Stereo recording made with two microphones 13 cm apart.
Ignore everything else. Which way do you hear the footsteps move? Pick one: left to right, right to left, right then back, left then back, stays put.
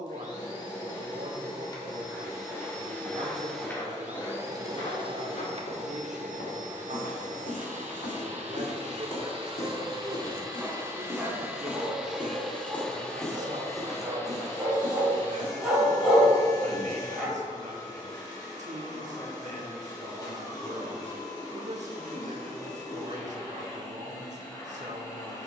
left then back.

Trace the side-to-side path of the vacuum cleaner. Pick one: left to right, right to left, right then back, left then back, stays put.
right then back.